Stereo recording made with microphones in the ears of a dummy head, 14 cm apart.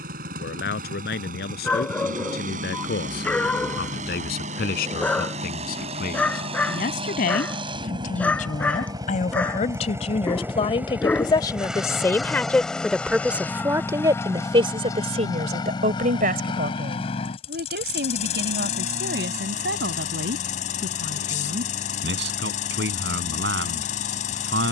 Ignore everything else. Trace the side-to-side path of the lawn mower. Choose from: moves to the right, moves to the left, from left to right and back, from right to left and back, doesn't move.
moves to the left.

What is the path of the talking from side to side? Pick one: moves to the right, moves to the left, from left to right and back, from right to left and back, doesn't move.
moves to the right.